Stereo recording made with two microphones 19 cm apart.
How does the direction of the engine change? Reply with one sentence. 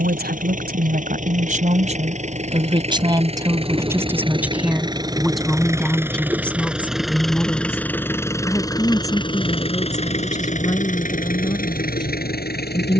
You can hear the engine travel towards the left.